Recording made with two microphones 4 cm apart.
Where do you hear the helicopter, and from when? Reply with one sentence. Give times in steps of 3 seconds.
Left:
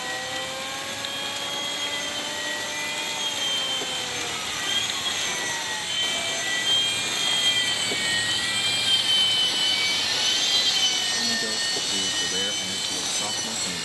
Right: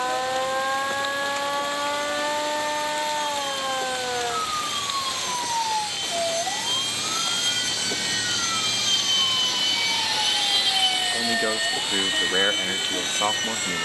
In this clip you hear the helicopter on the left from 0 s, in the centre from 9 s and on the right from 12 s.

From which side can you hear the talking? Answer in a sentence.
In this clip you hear the talking on the right.